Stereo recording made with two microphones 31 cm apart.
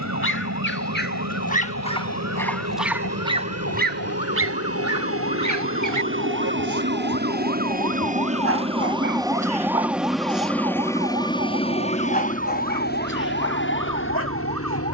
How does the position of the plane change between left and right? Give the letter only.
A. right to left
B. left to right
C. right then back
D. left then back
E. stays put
A.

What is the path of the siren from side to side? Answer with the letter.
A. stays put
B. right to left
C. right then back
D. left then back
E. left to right
E.